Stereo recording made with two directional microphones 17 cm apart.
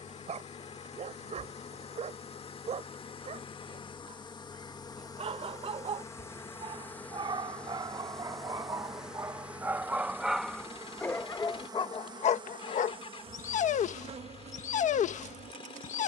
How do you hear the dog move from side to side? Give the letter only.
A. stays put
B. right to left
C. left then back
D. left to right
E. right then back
B.